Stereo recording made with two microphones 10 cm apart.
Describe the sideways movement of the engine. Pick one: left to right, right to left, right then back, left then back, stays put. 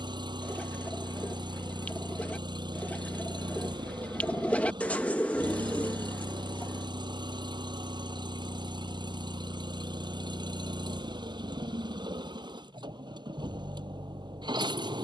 stays put.